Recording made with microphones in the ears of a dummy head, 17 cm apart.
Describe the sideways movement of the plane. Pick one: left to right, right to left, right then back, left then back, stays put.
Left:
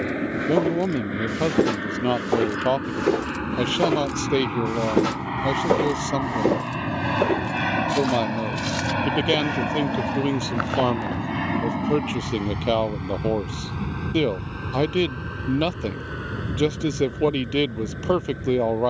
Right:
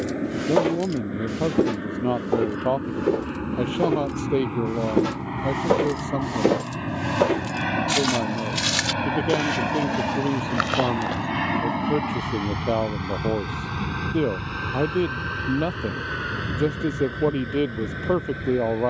left to right.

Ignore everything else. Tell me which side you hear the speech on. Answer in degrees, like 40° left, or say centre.
80° left.